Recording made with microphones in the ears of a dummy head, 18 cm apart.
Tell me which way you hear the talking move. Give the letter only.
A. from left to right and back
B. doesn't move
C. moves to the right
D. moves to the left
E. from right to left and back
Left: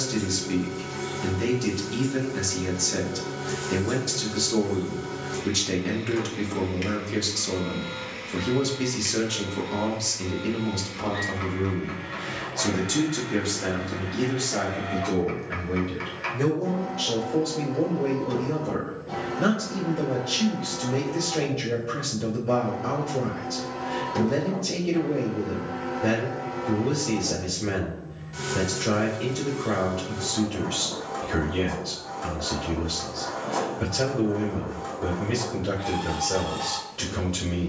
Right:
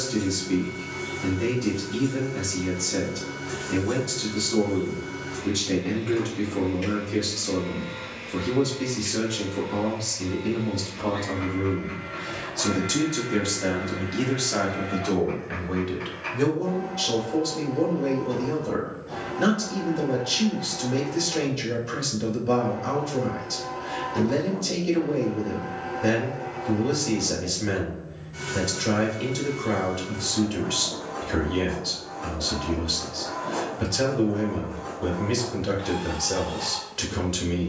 C.